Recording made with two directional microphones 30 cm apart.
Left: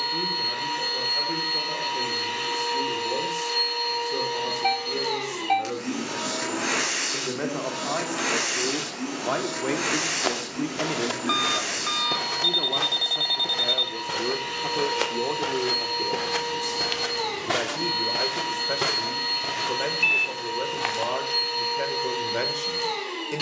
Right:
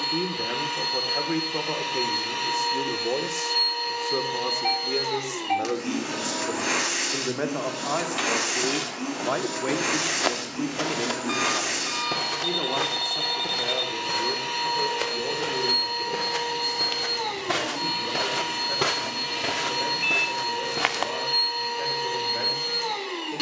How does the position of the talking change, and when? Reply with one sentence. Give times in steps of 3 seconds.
You can hear the talking on the right from 0 s, in the centre from 9 s and on the left from 12 s.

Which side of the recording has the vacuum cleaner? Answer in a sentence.
In this clip you hear the vacuum cleaner in the centre.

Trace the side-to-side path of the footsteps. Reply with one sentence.
You can hear the footsteps move from right to left and back again.